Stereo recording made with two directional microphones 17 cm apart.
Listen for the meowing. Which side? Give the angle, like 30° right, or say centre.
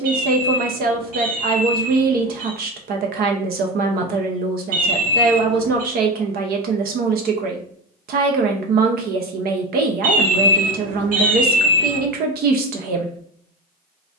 50° right.